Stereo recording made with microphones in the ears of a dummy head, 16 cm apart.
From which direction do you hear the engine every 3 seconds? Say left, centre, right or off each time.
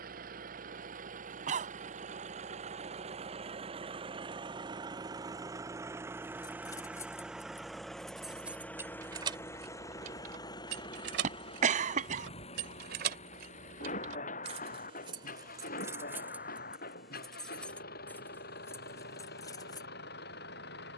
right, right, centre, left, left, left, left.